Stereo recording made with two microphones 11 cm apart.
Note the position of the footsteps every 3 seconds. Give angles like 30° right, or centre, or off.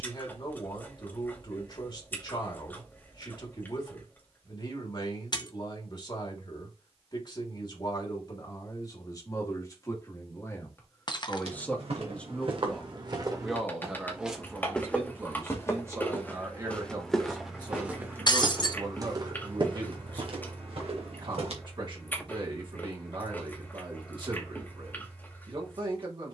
off, off, off, 60° right, 30° right, 10° left, 40° right, 60° right, off.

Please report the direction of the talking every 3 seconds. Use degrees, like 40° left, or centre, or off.
40° left, 40° left, 40° left, 30° left, centre, 30° right, 40° right, 50° right, 50° right.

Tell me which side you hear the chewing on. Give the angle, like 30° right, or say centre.
20° left.